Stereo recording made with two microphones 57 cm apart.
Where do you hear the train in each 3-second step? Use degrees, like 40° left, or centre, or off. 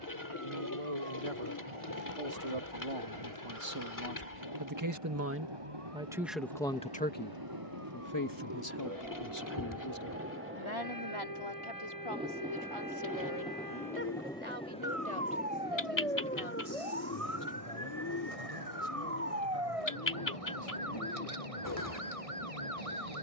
60° right, 50° right, 40° right, 20° right, centre, 20° left, 40° left, 50° left.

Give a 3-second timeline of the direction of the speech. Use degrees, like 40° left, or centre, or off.
70° right, 40° right, 20° left, 50° left, 60° left, 70° left, 70° left, 80° left.